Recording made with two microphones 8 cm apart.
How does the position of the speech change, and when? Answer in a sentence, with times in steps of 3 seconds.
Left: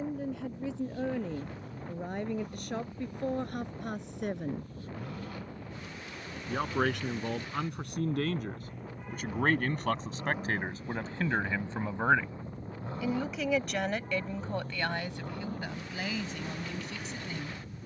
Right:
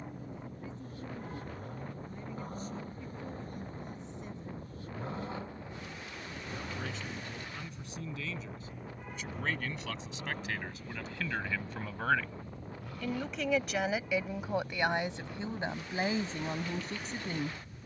In this clip you hear the speech on the left from 0 s, in the centre from 12 s and on the right from 15 s.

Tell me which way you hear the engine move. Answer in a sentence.
You can hear the engine move from right to left.